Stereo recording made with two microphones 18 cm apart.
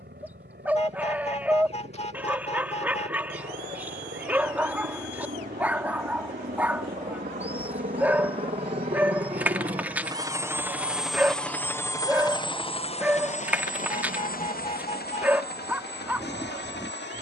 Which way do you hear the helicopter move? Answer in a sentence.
In this clip you hear the helicopter move from right to left.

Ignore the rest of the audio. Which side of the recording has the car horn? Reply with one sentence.
You can hear the car horn on the left.